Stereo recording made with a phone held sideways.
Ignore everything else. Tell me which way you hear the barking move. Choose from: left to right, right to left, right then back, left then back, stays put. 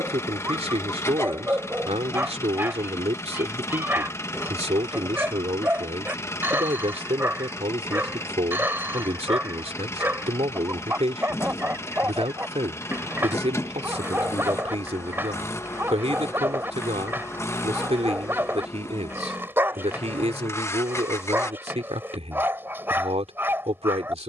stays put.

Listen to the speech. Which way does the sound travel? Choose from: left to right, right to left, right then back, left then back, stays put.
stays put.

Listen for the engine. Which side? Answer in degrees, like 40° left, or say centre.
20° left.